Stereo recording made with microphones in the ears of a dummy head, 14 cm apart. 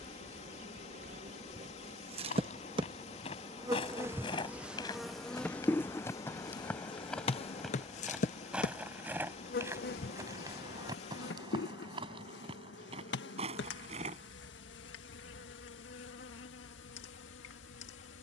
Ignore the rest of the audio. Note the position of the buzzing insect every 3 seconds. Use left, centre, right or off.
right, centre, left, left, left, left.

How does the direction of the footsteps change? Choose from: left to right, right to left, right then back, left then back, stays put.
left to right.